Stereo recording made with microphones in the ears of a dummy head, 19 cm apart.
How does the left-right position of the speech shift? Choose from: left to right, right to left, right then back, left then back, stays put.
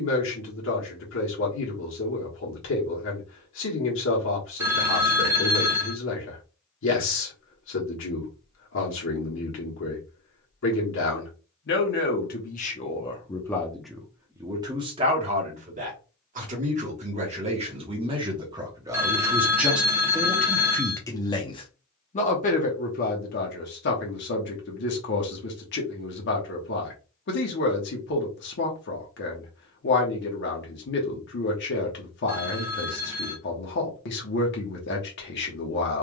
right then back.